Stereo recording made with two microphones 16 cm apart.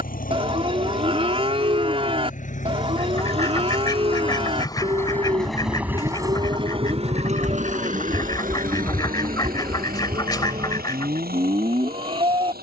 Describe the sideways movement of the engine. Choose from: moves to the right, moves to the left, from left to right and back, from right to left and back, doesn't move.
moves to the right.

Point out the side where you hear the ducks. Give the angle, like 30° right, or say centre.
30° left.